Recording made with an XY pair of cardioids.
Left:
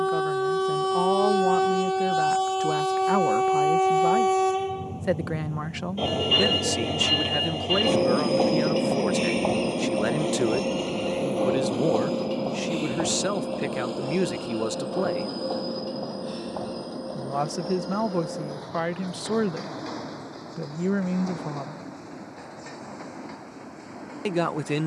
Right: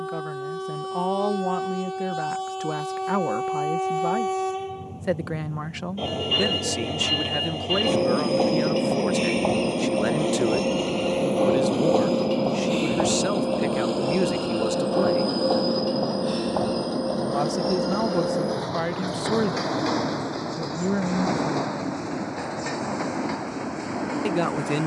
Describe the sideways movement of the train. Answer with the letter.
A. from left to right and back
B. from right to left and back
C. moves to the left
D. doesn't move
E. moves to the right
E.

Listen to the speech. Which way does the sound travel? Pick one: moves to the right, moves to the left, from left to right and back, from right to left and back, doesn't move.
doesn't move.